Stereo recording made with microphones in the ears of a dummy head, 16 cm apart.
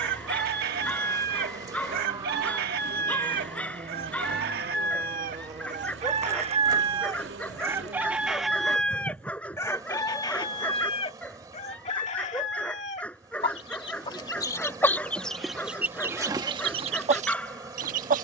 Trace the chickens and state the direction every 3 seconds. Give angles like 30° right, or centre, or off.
50° right, 50° right, 20° right, 30° left, 30° left, 20° right.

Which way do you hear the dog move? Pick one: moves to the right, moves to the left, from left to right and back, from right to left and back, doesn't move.
doesn't move.